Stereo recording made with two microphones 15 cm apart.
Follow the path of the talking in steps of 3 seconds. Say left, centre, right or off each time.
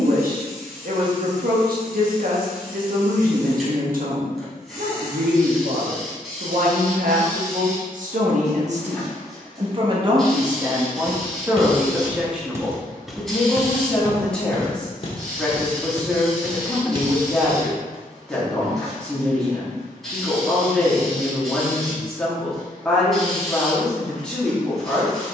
right, right, right, right, centre, centre, centre, centre, centre.